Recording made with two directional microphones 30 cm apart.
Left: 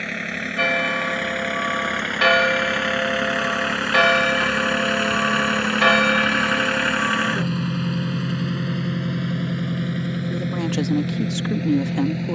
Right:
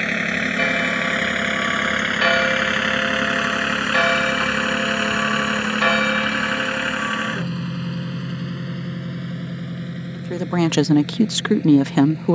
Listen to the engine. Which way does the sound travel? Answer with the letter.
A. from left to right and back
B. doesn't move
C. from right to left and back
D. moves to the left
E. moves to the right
D.